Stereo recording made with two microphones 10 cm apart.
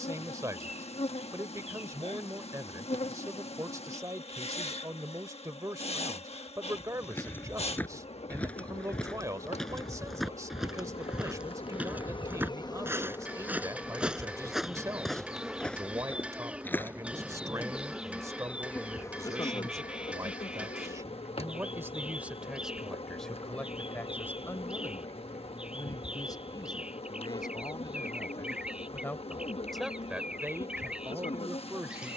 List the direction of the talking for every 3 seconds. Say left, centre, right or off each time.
right, right, right, right, right, right, right, centre, left, left, right.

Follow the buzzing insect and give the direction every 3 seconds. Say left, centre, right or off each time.
left, left, left, left, left, centre, left, left, left, left, left.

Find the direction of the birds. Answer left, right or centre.
centre.